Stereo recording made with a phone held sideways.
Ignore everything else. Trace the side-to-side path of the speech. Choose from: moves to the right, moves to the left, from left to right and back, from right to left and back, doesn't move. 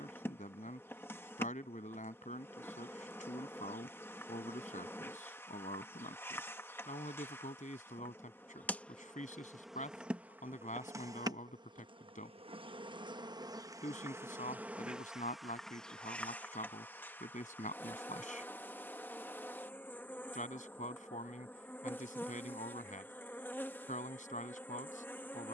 doesn't move.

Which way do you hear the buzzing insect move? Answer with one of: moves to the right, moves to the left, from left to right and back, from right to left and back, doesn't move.
from left to right and back.